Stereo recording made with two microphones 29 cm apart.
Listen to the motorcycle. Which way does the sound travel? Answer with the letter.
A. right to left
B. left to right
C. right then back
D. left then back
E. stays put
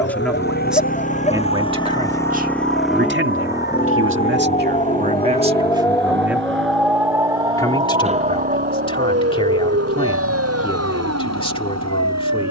B.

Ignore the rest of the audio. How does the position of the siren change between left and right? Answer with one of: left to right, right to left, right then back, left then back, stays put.
left to right.